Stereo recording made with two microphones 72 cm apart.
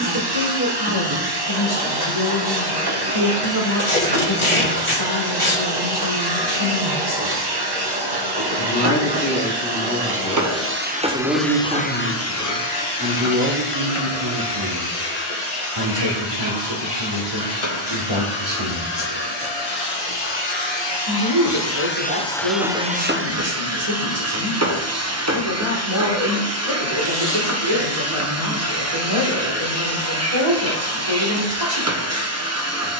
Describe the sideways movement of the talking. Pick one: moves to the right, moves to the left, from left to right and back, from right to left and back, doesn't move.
moves to the right.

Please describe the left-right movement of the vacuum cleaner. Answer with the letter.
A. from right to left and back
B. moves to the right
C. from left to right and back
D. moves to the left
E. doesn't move
A.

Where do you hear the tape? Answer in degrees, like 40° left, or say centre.
40° left.